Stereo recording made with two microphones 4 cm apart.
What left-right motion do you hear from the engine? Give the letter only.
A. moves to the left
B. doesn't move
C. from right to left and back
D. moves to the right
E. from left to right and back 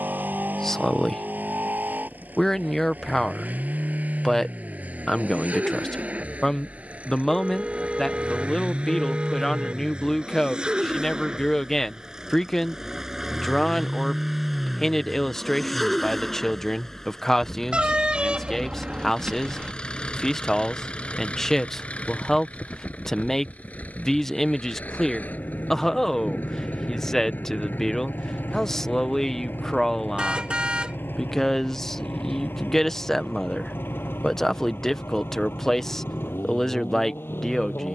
A.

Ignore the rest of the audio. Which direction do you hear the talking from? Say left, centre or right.
centre.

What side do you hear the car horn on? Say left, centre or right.
right.